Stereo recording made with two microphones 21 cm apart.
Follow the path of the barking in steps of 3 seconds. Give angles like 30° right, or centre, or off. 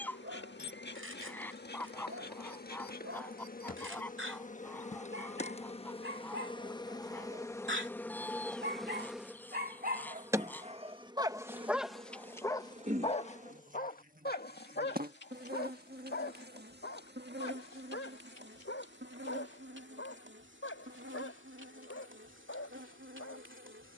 80° right, 80° right, 60° right, 30° right, 30° left, 60° left, 70° left, 80° left.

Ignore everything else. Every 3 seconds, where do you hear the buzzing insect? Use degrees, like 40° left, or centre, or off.
50° left, 40° left, 10° left, 10° right, 40° right, 50° right, 60° right, 70° right.